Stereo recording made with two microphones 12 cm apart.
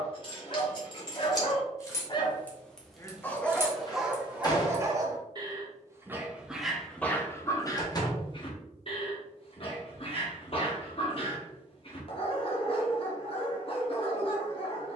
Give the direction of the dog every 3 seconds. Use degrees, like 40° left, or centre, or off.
40° left, 10° right, 10° left, 50° left, 50° left.